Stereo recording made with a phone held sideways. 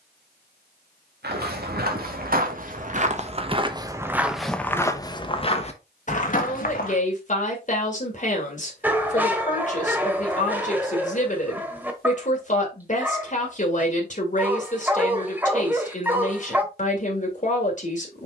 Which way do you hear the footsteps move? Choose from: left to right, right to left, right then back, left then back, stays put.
right to left.